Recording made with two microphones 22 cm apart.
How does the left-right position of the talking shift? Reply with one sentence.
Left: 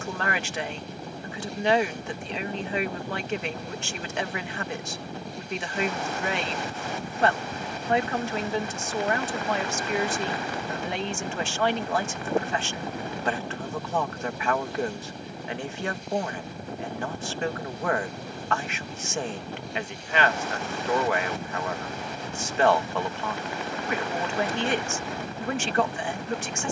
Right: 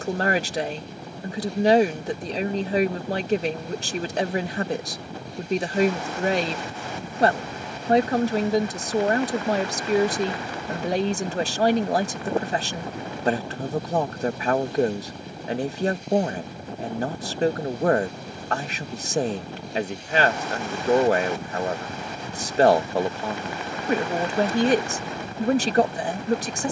You can hear the talking stay put.